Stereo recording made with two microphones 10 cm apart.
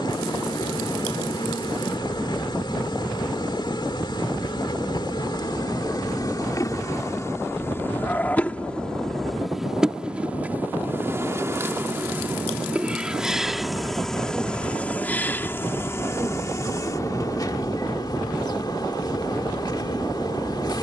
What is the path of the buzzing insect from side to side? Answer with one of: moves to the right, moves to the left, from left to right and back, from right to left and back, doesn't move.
from left to right and back.